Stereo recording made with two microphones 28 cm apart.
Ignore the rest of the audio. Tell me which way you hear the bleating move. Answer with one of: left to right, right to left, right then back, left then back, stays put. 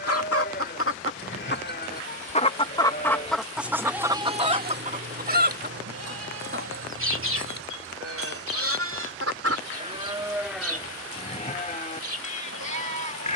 right then back.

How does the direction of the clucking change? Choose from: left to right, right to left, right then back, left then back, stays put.
left to right.